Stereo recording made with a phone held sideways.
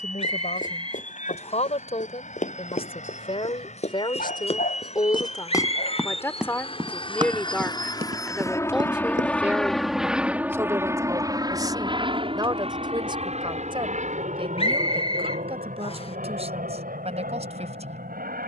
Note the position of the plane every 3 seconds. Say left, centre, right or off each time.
left, left, left, centre, right, right.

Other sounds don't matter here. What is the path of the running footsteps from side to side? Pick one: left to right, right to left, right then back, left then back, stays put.
left to right.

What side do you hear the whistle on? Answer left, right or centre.
left.